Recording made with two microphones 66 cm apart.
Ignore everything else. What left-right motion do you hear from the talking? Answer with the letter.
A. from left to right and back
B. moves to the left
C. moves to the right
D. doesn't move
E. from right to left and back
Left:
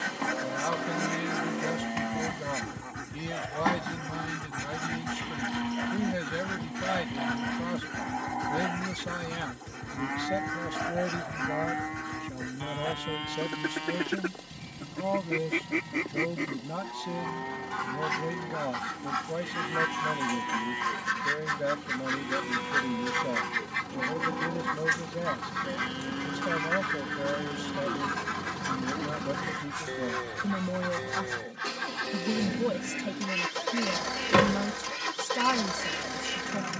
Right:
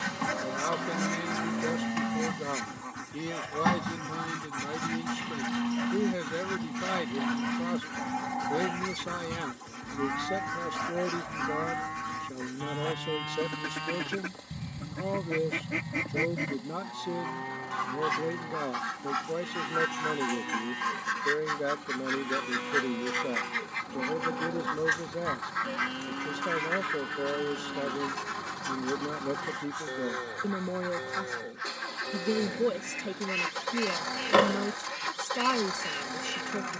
D.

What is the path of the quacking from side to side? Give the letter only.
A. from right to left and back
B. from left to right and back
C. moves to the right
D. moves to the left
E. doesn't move
D.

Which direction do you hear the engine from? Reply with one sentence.
You can hear the engine on the left.